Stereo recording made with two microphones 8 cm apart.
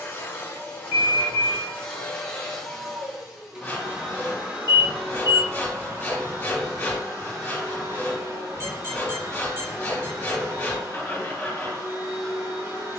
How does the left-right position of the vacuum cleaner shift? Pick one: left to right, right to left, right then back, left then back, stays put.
left to right.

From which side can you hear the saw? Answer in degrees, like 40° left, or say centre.
20° left.